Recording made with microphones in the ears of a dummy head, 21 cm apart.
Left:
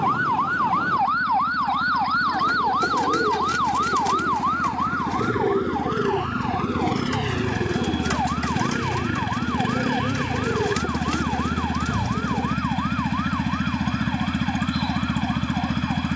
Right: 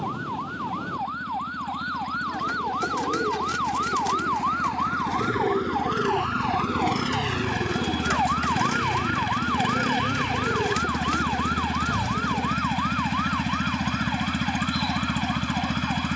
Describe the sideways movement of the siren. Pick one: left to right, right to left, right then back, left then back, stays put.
left to right.